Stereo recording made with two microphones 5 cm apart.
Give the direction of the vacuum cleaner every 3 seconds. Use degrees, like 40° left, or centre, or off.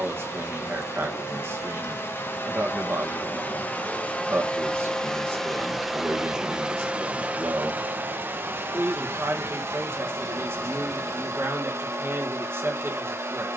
50° left, 20° left, 30° right, 60° right, 60° right.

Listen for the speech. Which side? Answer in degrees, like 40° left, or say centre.
50° right.